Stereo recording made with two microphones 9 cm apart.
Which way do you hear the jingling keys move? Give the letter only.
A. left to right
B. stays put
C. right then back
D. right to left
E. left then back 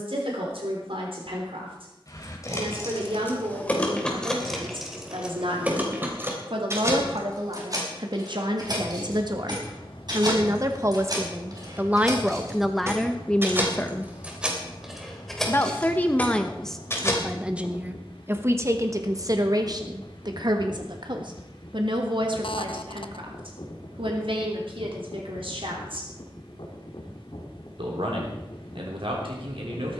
C.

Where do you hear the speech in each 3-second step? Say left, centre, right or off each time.
right, right, right, right, centre, centre, right, right, right, right.